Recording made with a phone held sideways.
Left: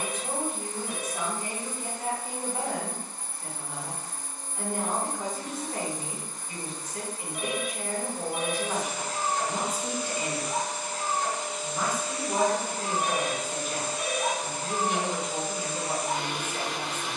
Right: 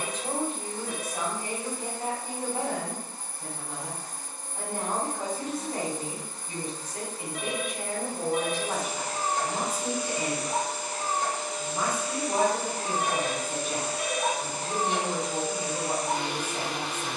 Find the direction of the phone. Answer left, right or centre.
centre.